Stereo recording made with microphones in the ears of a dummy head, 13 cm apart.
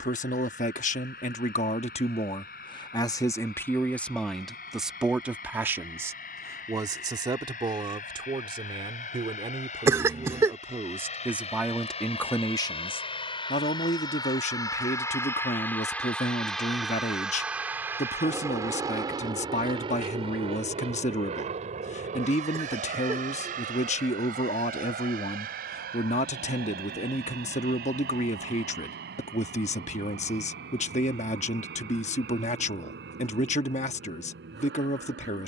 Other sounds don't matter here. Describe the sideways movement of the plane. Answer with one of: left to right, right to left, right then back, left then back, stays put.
left to right.